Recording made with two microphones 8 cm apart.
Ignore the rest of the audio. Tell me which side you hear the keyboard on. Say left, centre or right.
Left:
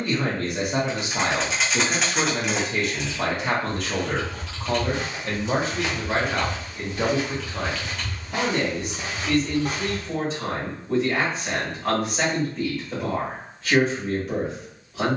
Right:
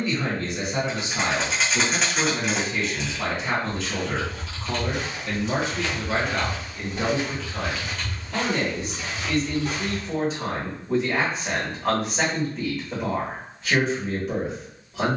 centre.